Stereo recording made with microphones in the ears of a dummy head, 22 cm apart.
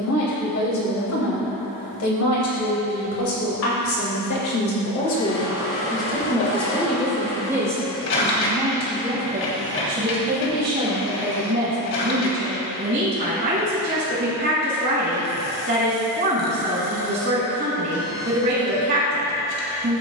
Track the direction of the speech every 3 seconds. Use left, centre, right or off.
left, left, centre, right, right, right, right.